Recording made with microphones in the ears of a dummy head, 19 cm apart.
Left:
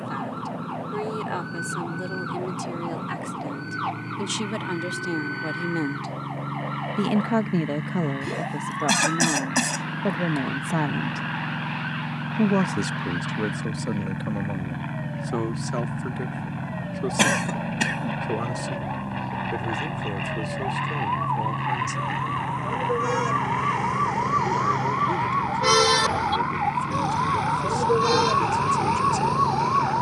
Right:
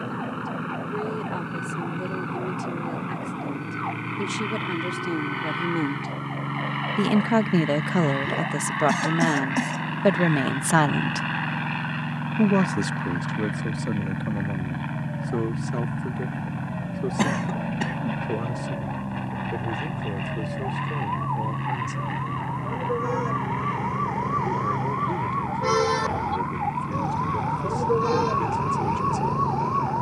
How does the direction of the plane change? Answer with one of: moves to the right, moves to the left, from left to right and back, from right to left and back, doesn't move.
moves to the left.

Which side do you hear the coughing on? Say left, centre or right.
left.